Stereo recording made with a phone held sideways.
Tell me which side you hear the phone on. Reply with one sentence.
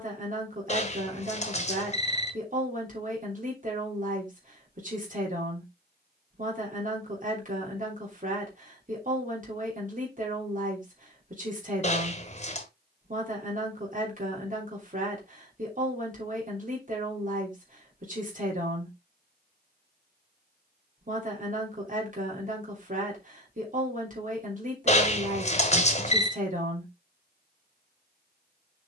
In this clip you hear the phone on the left.